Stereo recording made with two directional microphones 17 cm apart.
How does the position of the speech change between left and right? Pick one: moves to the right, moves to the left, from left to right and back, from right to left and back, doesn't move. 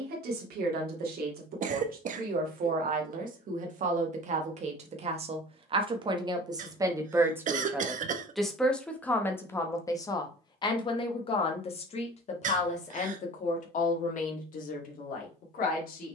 moves to the left.